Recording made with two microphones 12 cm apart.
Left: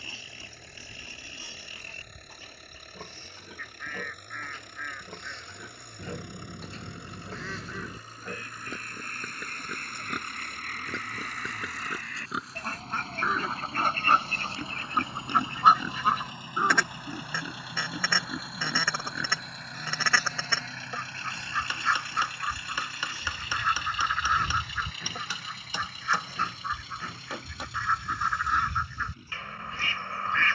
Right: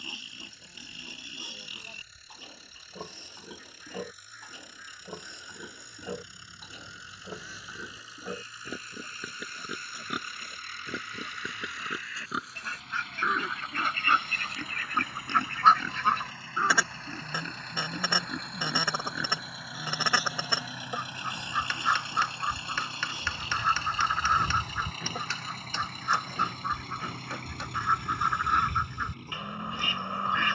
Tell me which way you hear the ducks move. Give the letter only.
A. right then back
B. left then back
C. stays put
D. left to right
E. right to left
D.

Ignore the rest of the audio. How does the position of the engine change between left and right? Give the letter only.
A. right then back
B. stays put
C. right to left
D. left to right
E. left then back
D.